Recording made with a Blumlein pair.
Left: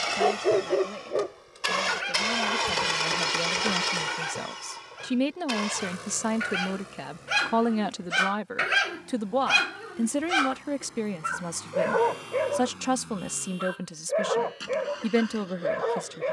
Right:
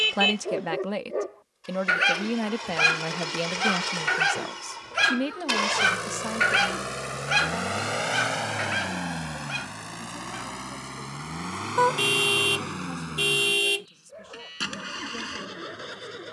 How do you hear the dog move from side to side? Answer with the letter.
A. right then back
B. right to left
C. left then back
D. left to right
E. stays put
A.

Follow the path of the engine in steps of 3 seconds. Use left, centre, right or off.
left, centre, right, right, right, right.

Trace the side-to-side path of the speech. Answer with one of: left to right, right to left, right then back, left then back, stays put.
right to left.